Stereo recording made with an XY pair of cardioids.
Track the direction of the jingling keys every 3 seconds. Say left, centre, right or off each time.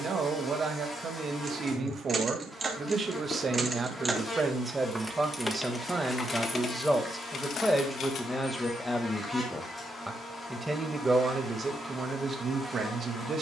right, centre, left, off, off.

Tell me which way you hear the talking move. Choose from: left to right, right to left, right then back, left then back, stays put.
left then back.